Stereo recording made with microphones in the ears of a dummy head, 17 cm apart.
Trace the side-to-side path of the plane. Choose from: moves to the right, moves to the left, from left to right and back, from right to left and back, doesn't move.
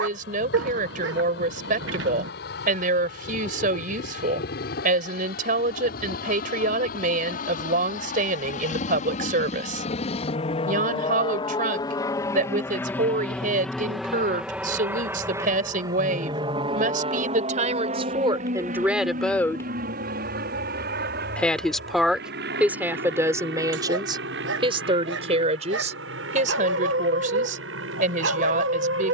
moves to the right.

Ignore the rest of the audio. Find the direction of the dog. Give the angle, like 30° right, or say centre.
70° right.